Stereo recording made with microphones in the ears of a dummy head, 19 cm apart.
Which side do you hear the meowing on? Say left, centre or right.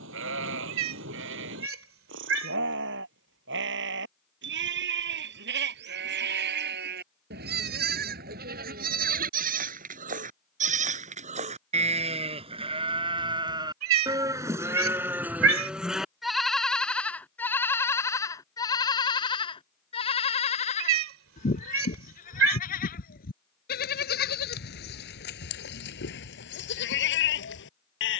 right.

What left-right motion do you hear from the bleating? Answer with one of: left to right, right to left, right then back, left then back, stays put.
right to left.